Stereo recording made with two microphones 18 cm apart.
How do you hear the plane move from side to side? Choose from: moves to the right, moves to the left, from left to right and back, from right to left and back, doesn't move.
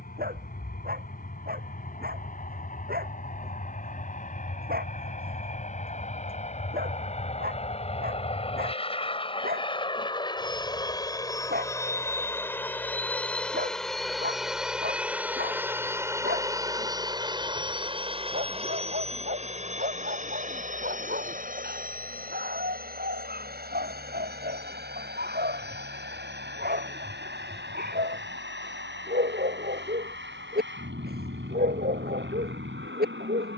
moves to the right.